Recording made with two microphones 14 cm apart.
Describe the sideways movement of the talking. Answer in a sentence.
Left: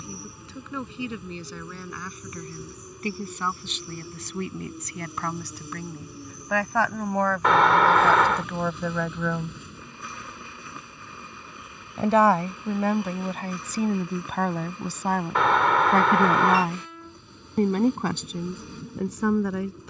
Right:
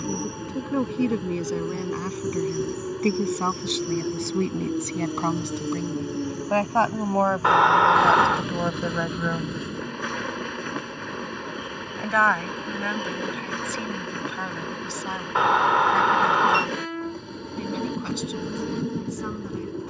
You can hear the talking go from the right side to the left.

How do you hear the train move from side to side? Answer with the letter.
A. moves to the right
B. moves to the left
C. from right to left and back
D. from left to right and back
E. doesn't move
E.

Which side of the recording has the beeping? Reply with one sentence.
You can hear the beeping in the centre.